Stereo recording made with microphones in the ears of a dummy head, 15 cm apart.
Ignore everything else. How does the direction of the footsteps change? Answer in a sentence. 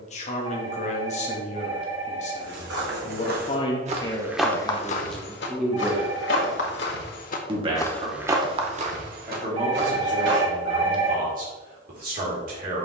You can hear the footsteps go left and come back.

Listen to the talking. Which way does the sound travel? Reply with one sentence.
In this clip you hear the talking travel towards the right.